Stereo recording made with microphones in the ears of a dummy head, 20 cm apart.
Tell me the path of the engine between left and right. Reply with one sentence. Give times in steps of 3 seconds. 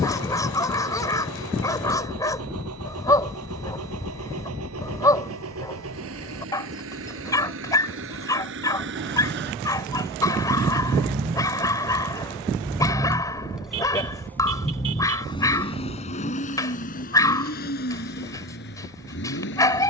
You can hear the engine on the right from 0 s, in the centre from 12 s and on the left from 15 s.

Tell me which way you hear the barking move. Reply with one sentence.
In this clip you hear the barking stay in one place.